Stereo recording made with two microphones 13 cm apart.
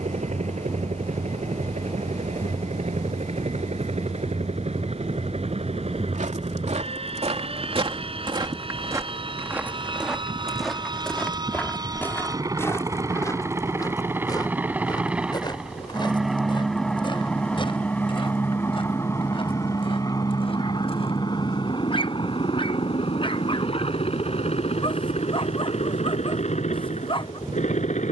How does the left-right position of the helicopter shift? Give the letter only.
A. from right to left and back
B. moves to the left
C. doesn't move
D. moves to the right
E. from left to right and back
B.